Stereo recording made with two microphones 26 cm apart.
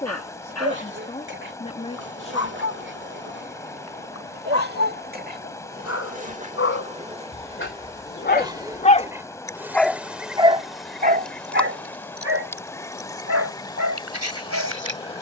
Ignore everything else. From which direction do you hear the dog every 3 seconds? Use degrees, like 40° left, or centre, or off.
70° left, 70° left, 50° left, 20° right, 70° right.